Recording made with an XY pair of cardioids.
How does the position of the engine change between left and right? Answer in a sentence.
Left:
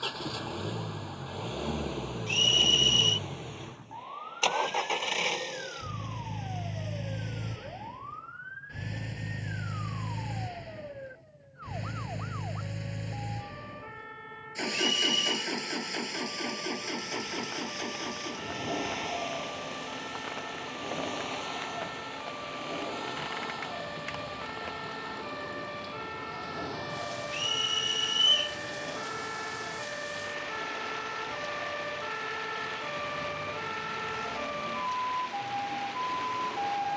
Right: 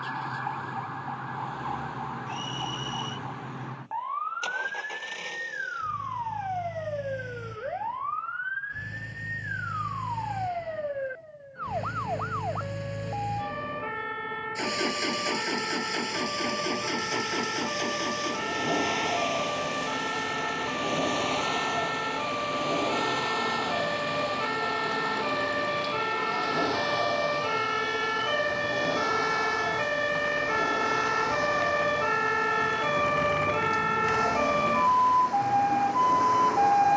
In this clip you hear the engine go from the left side to the right.